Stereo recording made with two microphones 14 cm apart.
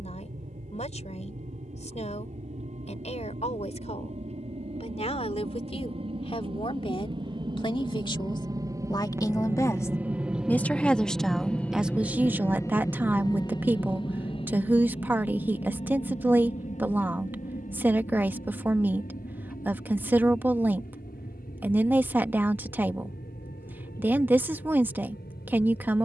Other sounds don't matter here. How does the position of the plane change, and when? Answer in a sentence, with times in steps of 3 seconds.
You can hear the plane on the right from 0 s, in the centre from 9 s and on the left from 12 s.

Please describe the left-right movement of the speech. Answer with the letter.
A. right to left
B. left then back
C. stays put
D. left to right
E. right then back
D.